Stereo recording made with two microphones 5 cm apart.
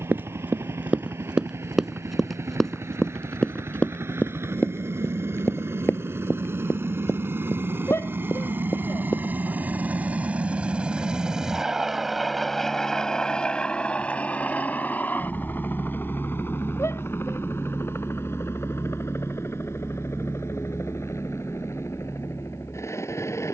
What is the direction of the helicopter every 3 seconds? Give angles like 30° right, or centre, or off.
80° right, 70° right, 50° right, 30° right, 20° left, 50° left, 60° left, 70° left.